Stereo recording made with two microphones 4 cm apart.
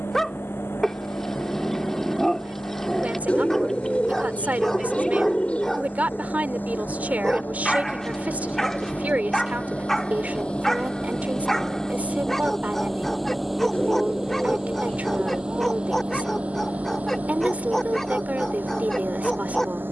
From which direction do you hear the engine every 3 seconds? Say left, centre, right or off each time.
left, left, left, left, centre, right, right.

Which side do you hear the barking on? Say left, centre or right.
centre.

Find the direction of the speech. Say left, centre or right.
right.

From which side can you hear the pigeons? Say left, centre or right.
left.